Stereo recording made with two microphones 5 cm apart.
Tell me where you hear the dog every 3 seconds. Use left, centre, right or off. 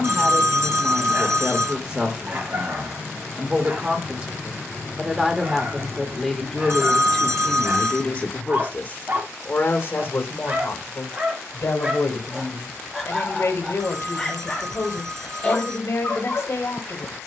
right, right, right, right, centre, left.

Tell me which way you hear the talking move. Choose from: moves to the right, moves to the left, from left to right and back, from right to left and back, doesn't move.
moves to the left.